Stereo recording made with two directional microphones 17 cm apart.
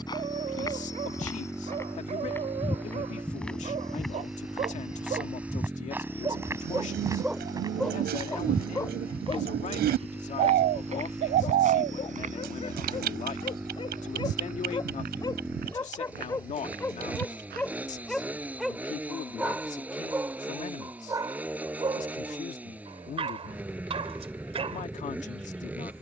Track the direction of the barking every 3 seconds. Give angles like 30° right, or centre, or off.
40° right, 40° right, centre, 30° left, 30° left, 20° left, 10° right, 30° right, 40° right.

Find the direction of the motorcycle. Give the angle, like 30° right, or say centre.
10° right.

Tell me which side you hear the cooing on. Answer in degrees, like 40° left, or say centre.
70° right.